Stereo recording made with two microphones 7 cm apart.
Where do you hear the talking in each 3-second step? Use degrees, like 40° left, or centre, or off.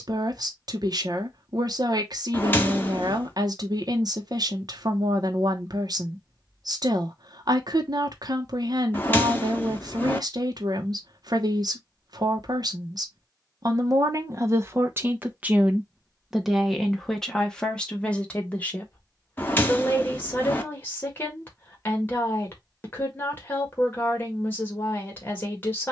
60° right, 60° right, 60° right, 60° right, 50° right, centre, 20° left, 30° left, 30° left.